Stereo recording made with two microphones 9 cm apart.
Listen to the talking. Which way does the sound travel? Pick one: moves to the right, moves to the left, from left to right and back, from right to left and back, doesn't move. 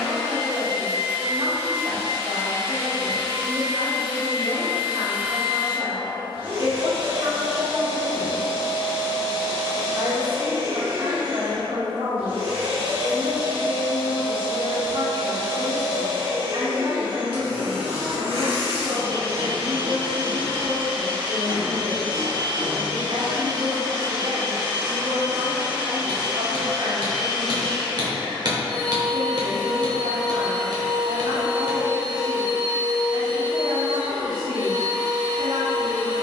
doesn't move.